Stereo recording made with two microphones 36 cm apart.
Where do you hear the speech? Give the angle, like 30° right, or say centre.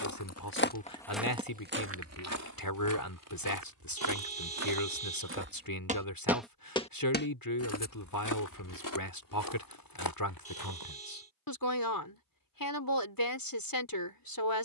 70° left.